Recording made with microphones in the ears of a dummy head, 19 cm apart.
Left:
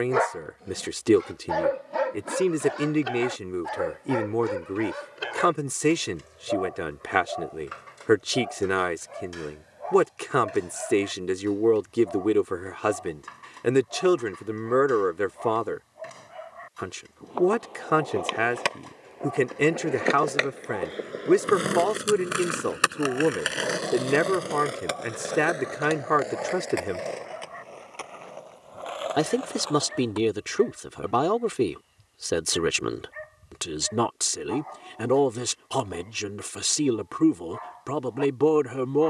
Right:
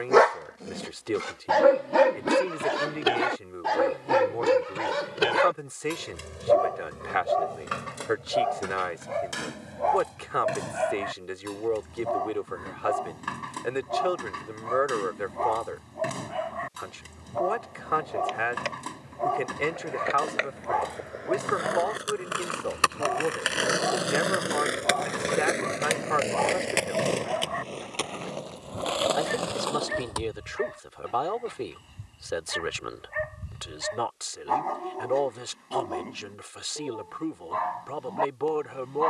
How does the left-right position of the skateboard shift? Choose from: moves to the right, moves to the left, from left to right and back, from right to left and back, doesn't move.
moves to the right.